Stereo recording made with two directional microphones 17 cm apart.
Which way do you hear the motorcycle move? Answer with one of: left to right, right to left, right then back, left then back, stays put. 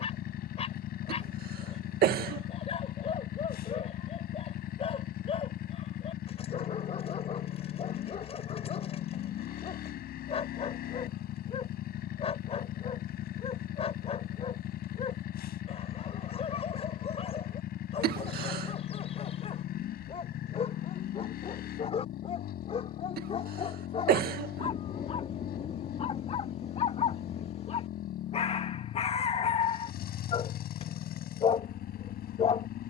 stays put.